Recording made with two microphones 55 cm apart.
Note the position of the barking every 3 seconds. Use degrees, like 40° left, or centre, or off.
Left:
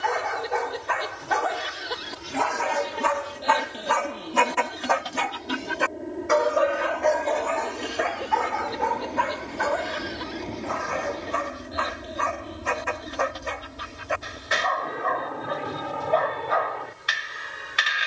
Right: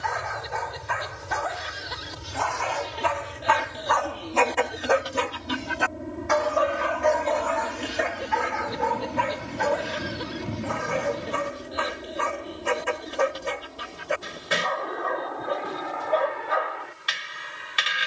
70° left, 30° left, 40° right, 50° right, 50° right, 50° right.